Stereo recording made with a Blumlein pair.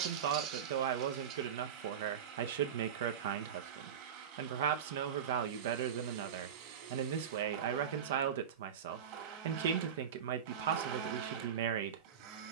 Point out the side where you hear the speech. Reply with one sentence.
You can hear the speech on the right.